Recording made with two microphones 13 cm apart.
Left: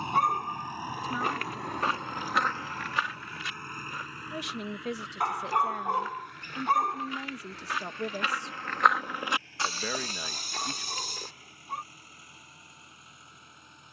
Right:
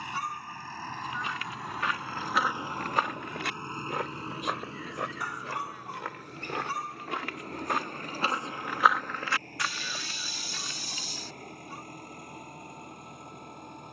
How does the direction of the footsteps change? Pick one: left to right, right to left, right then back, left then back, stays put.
right then back.